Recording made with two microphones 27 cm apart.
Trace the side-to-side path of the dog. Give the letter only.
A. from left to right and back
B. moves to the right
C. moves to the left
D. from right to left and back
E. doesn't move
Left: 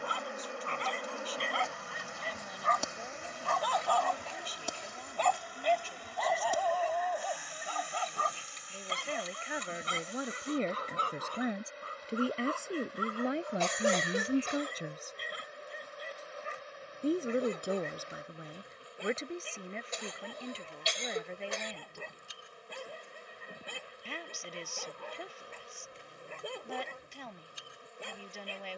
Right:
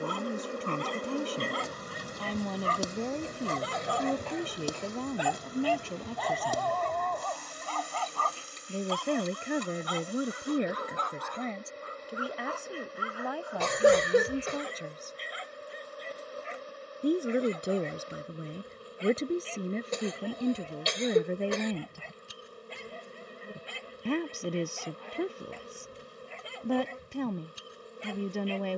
C.